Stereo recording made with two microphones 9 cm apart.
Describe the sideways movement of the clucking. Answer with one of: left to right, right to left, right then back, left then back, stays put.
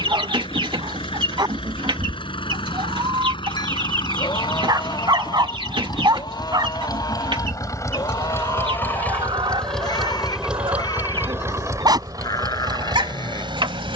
stays put.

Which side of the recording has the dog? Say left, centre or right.
right.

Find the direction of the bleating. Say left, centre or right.
left.